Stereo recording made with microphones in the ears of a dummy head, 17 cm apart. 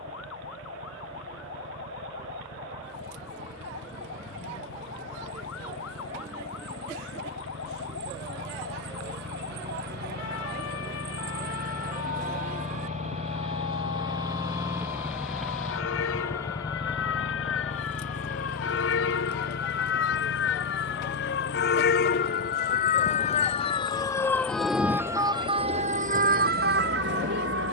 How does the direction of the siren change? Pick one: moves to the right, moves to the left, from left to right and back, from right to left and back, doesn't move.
moves to the right.